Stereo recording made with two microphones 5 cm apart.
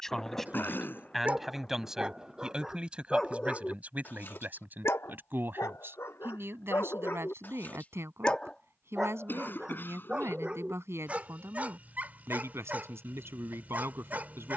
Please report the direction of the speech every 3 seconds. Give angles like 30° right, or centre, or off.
10° right, 40° right, 60° right, 70° right, 70° right.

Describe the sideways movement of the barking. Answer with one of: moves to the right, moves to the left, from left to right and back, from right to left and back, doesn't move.
from right to left and back.